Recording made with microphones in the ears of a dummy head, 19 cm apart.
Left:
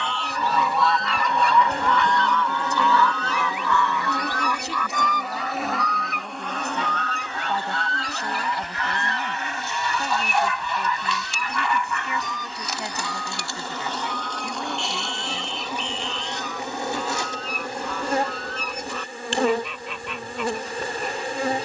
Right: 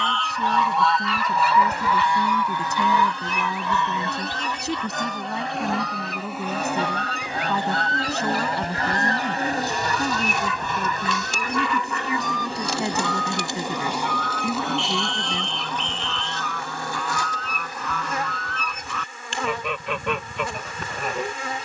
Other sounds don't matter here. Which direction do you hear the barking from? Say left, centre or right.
left.